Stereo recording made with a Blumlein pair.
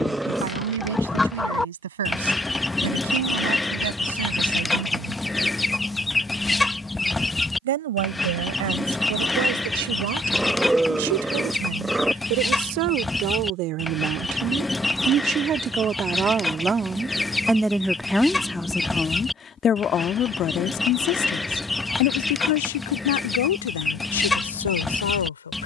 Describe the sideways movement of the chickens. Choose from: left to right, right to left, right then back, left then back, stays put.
stays put.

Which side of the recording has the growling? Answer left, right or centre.
centre.